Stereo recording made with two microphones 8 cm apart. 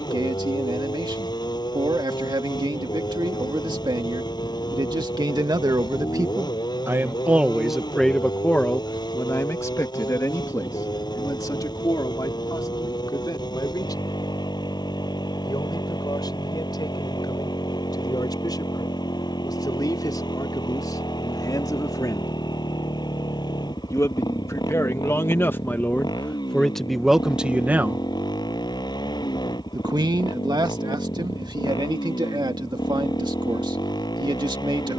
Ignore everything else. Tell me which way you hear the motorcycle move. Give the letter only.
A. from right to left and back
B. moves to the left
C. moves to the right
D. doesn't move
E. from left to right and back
D.